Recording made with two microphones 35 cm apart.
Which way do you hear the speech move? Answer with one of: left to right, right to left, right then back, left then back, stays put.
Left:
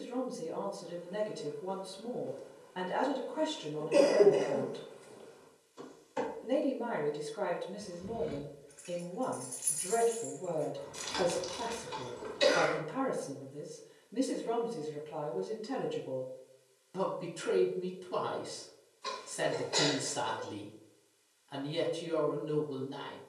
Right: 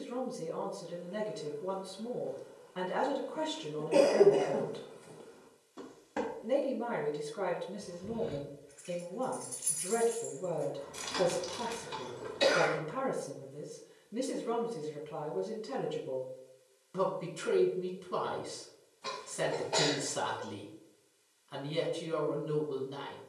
stays put.